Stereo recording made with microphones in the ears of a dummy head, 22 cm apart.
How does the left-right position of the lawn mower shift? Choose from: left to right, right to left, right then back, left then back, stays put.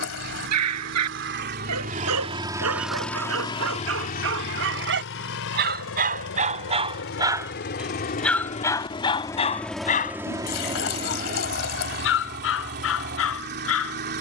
left then back.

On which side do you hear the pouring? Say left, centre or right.
left.